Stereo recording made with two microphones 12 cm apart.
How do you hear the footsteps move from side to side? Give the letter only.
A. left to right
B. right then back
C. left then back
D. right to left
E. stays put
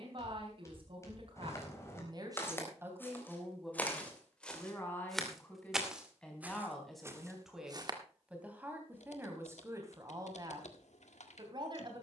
A.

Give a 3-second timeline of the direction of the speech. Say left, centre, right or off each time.
right, centre, centre, right.